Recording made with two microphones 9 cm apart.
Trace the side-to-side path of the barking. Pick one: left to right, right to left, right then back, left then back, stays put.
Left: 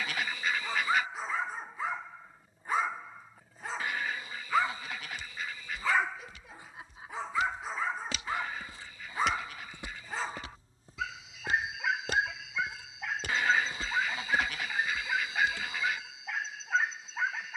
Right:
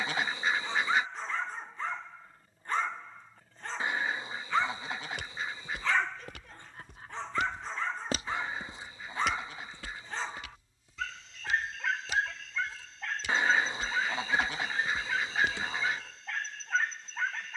stays put.